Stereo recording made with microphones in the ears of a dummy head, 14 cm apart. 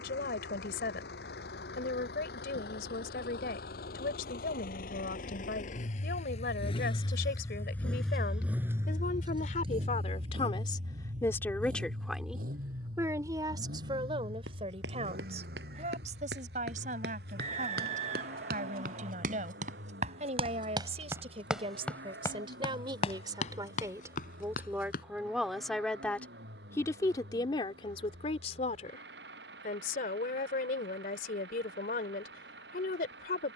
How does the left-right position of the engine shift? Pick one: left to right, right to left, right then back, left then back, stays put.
left to right.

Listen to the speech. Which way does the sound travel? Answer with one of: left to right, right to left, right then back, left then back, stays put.
right then back.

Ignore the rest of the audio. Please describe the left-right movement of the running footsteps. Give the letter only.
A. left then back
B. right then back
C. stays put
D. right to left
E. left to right
D.